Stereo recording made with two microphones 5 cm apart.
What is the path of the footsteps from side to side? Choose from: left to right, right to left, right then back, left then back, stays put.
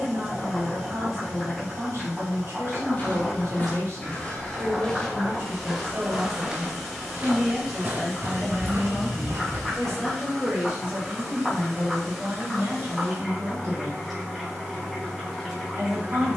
left to right.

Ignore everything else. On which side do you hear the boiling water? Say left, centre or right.
centre.